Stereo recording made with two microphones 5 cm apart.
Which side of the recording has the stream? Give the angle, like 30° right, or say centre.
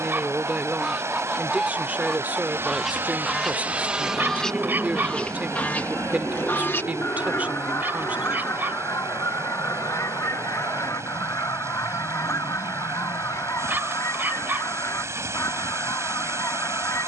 60° right.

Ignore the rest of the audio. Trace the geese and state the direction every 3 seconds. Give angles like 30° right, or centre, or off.
10° right, 10° left, 60° left, 80° left, 80° left, 80° left.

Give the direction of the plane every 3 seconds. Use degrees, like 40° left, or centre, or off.
60° right, centre, 60° left, 70° left, 80° left, 80° left.